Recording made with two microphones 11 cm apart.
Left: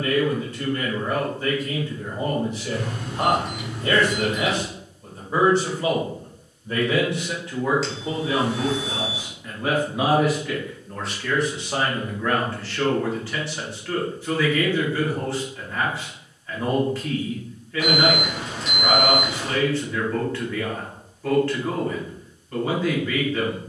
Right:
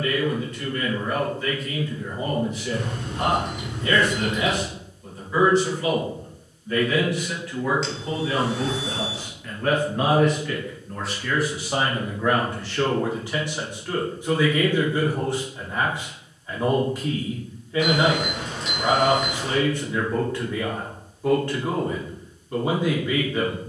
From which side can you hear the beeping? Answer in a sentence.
In this clip you hear the beeping in the centre.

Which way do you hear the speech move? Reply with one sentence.
You can hear the speech travel towards the right.